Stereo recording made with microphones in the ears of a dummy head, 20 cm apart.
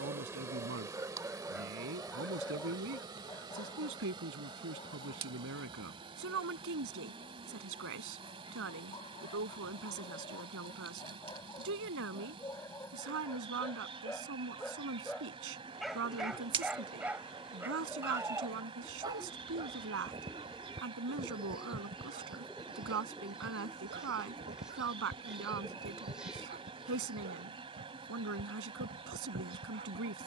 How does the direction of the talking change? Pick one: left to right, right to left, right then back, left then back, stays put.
stays put.